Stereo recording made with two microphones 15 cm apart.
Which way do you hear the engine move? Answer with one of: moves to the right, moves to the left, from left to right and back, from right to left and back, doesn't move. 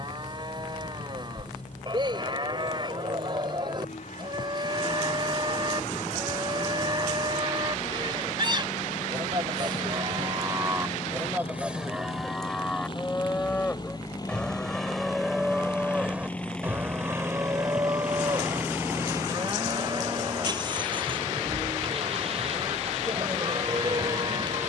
moves to the right.